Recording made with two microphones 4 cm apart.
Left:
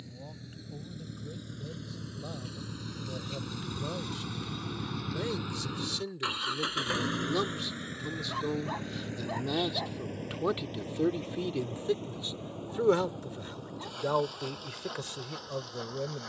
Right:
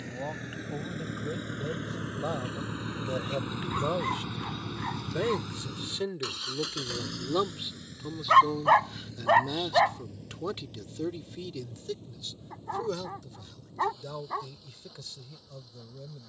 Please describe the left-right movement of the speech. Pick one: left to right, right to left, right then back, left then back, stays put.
right to left.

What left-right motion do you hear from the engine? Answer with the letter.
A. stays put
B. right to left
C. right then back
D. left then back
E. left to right
B.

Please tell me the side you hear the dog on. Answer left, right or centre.
right.